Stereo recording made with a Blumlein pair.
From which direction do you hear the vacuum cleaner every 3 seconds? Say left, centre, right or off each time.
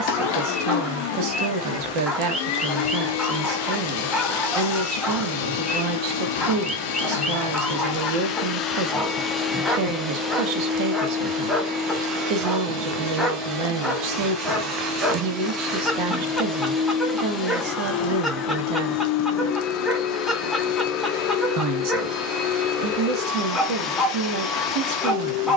left, left, left, centre, right, centre, left, left, left.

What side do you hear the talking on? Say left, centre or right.
right.